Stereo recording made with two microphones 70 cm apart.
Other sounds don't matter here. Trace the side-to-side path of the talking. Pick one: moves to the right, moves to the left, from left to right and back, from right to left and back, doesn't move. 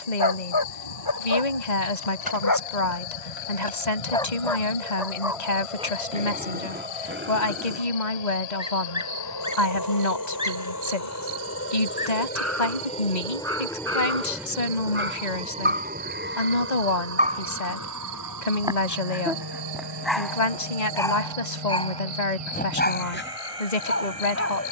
doesn't move.